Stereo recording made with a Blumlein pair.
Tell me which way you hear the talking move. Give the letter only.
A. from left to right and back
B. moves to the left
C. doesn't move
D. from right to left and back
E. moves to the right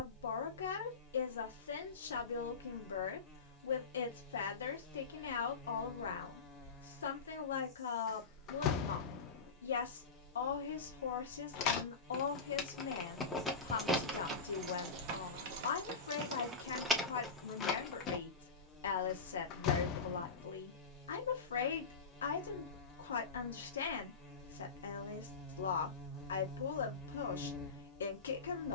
C.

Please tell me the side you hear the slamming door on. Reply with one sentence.
You can hear the slamming door on the left.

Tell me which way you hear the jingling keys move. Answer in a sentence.
In this clip you hear the jingling keys go right and come back.